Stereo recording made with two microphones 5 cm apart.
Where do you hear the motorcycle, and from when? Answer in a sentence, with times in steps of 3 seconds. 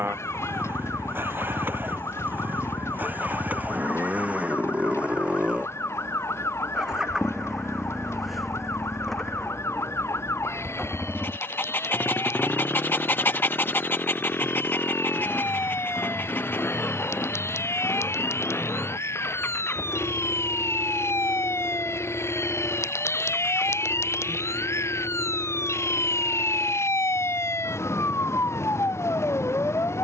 You can hear the motorcycle on the right from 0 s, in the centre from 6 s and on the left from 12 s.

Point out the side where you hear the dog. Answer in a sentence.
You can hear the dog on the left.